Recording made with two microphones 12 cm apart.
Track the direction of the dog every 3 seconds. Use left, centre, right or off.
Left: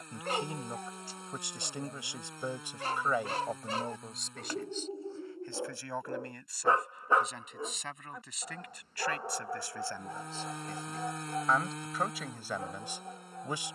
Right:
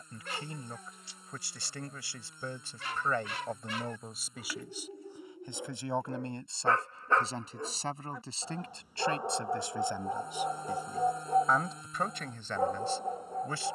left, left, centre, right, right.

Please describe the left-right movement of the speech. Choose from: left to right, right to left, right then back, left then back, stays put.
right then back.